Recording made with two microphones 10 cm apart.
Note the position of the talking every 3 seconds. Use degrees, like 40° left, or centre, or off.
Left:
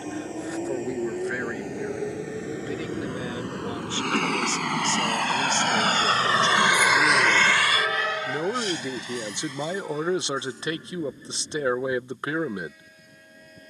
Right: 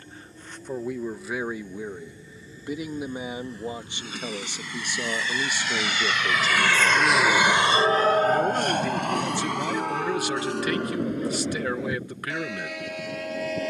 10° right, 20° right, centre, 20° left, 20° left.